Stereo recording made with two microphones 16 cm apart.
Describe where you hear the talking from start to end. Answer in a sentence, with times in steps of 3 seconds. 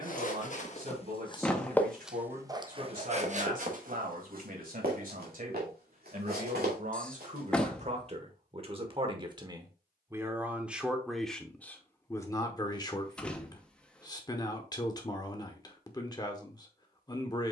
In this clip you hear the talking on the right from 0 s, in the centre from 9 s and on the left from 12 s.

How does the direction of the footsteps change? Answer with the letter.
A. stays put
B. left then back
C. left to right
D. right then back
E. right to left
C.